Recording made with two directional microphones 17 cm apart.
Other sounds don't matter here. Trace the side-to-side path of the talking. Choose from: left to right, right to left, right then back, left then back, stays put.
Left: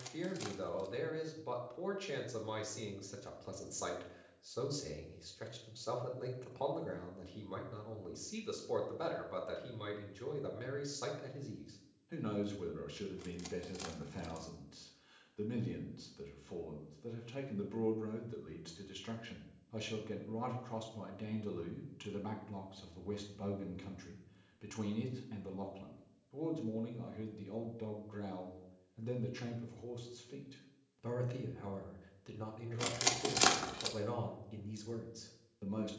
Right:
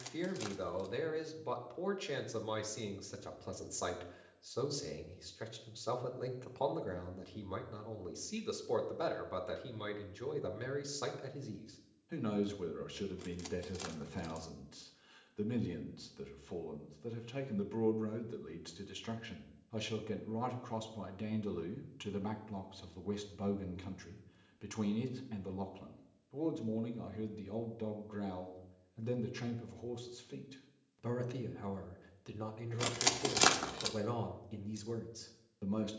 stays put.